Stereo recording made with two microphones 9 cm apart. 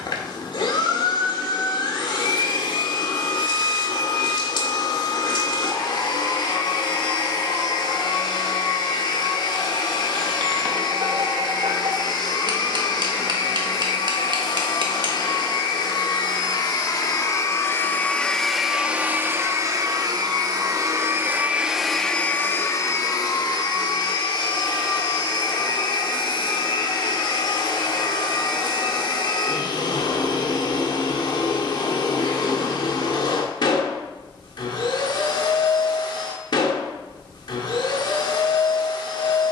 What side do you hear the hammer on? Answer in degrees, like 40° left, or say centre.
60° right.